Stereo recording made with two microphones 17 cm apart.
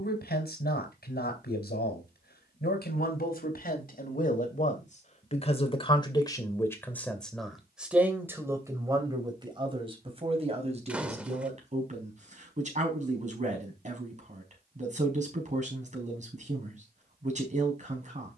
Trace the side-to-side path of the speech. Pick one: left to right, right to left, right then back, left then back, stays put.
left to right.